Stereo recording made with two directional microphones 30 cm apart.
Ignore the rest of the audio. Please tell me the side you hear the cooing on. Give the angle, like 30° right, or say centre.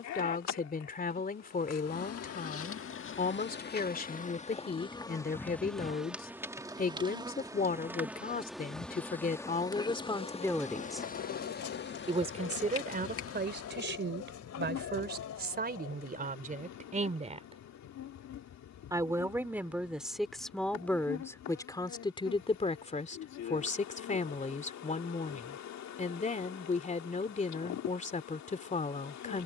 60° left.